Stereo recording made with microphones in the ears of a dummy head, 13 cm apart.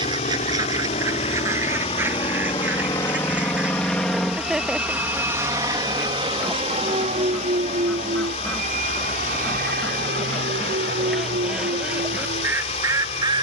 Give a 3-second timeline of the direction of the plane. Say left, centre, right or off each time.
left, centre, right, right, right.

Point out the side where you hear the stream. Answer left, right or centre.
left.